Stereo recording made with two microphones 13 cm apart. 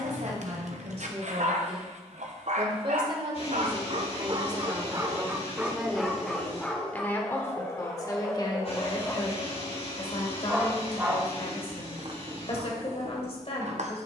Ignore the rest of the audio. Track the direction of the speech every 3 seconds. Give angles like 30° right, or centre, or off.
50° right, 20° right, 20° left, 50° left, 50° left.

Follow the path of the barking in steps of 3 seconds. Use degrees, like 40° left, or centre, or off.
70° right, 30° right, 10° left, 10° right, 60° right.